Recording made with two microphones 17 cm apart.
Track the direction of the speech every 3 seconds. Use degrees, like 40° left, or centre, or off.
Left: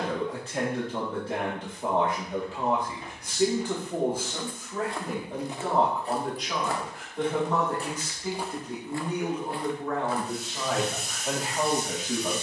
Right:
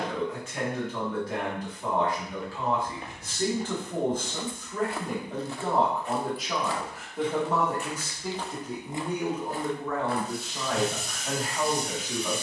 30° left, 10° left, 10° right, 10° left.